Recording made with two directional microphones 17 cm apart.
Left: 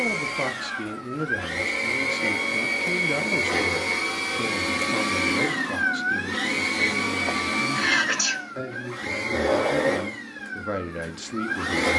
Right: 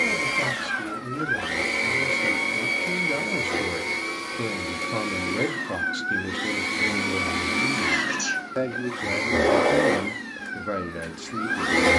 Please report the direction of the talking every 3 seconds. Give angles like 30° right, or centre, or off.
20° left, 10° right, 30° right, 10° right.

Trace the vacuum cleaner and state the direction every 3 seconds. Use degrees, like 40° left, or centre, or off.
20° right, 20° left, 10° right, 20° right.